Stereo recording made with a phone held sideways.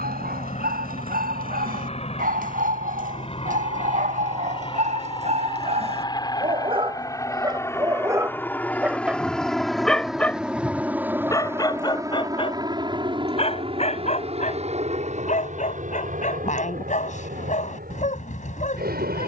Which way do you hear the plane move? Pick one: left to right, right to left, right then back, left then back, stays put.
left to right.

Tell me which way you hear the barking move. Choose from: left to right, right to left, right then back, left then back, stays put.
right to left.